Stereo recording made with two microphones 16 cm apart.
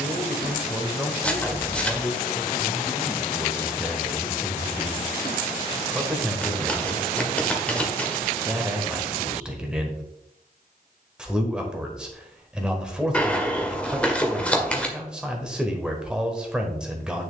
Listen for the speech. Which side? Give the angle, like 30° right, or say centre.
10° right.